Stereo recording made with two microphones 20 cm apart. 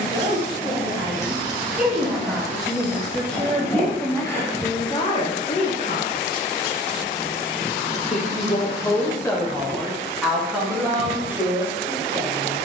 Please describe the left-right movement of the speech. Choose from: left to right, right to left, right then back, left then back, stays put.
left then back.